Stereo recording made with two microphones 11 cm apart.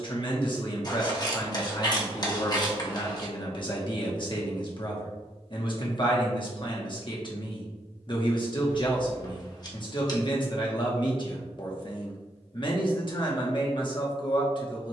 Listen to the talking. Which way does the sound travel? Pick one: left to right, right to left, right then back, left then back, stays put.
stays put.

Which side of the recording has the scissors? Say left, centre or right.
left.